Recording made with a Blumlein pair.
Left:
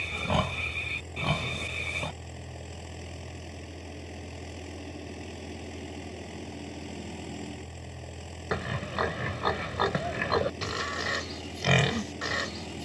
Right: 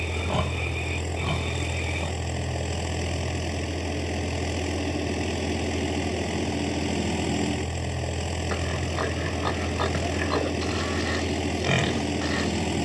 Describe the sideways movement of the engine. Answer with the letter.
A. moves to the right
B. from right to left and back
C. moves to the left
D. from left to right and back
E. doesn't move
E.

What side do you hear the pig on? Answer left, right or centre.
centre.